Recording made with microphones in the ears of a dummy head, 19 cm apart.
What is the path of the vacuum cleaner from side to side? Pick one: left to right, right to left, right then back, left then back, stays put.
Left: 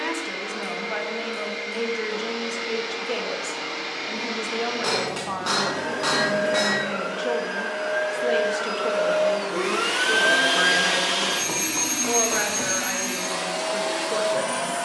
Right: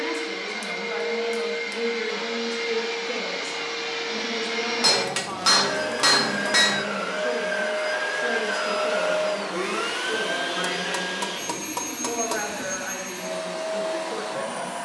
right to left.